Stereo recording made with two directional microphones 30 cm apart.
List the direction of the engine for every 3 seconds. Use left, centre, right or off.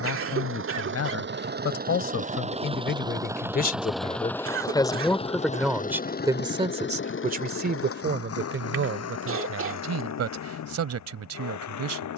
right, centre, left, left.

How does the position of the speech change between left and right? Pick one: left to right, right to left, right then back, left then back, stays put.
left to right.